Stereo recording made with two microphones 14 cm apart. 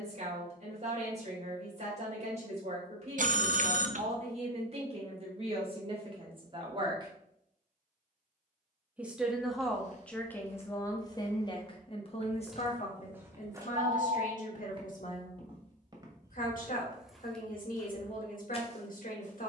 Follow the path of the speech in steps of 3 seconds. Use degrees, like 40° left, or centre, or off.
50° right, 50° right, 40° right, 10° left, 60° left, 70° left, 70° left.